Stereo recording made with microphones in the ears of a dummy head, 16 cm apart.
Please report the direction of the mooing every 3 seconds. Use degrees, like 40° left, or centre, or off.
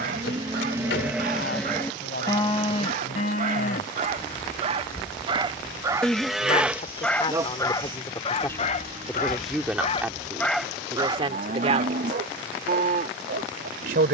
centre, 30° left, 20° right, 50° right, 50° right.